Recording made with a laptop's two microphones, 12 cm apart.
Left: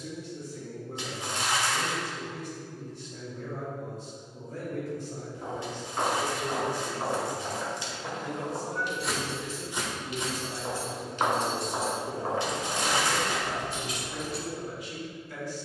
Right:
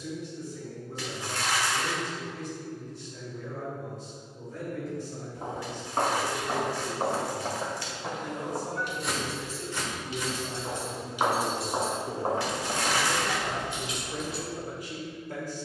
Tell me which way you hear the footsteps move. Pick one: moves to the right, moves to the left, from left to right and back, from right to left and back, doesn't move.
from right to left and back.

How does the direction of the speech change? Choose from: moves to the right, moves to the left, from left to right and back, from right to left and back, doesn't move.
moves to the right.